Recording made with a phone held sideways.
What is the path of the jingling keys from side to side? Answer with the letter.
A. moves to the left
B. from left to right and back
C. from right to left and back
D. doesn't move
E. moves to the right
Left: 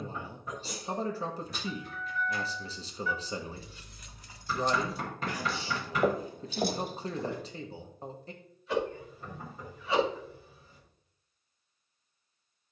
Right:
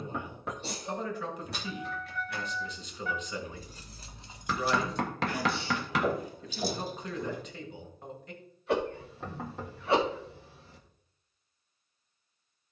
A.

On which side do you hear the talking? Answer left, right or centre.
left.